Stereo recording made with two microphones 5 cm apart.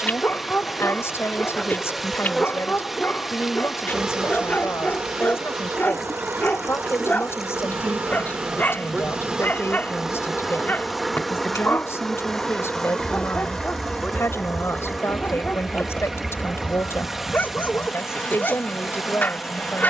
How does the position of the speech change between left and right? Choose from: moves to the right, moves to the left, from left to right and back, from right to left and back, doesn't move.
doesn't move.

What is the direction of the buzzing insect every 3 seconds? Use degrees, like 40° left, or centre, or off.
20° left, 30° right, 40° right, 10° right, 20° left, 40° left, 40° left.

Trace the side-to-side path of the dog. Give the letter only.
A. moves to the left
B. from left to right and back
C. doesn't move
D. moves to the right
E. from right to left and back
C.